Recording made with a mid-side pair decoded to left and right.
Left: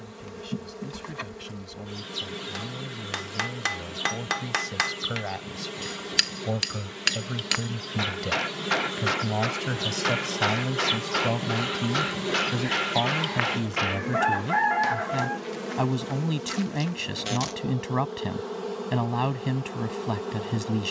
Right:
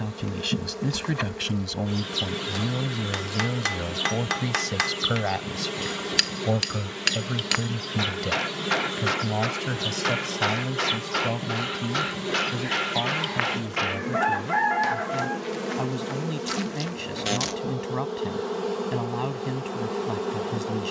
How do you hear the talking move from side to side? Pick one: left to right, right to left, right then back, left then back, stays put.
right to left.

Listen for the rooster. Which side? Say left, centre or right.
centre.